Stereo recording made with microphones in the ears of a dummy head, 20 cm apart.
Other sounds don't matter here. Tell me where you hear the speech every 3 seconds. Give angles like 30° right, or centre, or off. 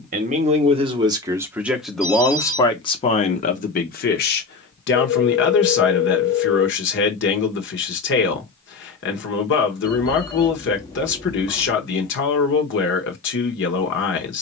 10° right, 50° left, 50° left, 50° left, 50° left.